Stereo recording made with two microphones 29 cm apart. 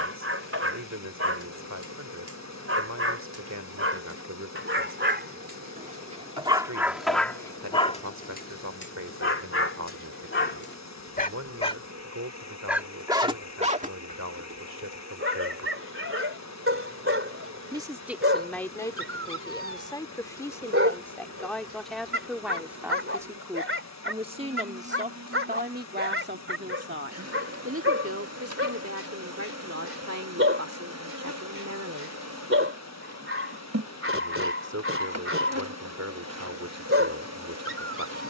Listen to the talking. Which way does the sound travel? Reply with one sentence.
You can hear the talking go left and come back.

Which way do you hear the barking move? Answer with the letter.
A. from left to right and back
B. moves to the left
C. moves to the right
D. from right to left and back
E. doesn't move
D.